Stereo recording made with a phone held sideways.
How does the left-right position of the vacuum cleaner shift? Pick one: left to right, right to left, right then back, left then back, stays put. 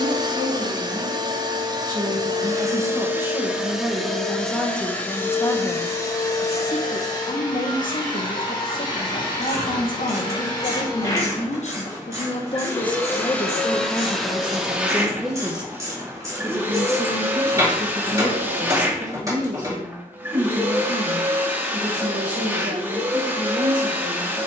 left then back.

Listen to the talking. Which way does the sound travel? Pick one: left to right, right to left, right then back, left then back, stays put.
left then back.